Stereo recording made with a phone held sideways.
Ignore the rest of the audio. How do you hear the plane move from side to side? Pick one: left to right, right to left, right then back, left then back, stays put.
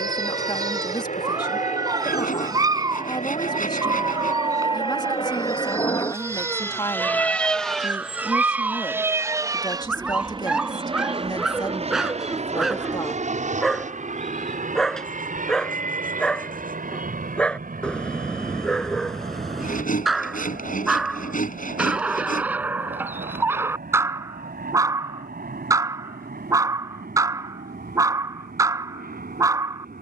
left to right.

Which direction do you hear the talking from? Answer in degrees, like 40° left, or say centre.
30° left.